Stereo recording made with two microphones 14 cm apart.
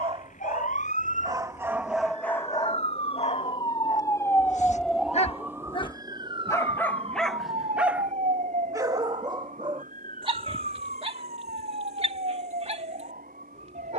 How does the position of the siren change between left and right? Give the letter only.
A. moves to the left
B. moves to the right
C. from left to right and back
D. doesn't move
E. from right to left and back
B.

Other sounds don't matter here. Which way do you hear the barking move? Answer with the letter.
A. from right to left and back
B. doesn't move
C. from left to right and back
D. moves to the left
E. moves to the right
A.